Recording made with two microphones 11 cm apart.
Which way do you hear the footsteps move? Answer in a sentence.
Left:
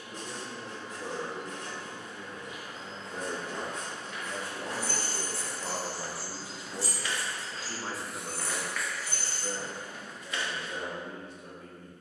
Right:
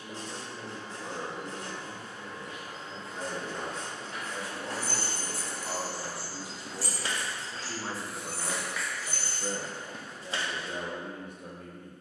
You can hear the footsteps move from left to right and back again.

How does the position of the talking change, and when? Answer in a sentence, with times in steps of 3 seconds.
In this clip you hear the talking on the left from 0 s, in the centre from 6 s and on the right from 9 s.